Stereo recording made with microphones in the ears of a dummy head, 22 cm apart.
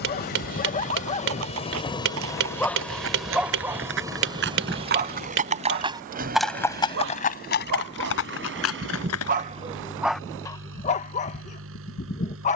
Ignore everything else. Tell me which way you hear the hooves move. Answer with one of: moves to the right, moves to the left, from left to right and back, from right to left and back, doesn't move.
moves to the left.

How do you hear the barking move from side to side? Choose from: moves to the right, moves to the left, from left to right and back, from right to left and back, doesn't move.
from left to right and back.